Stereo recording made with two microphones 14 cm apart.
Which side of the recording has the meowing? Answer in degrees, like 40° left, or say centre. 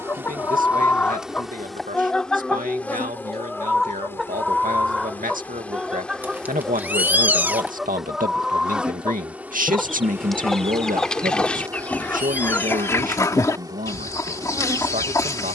10° right.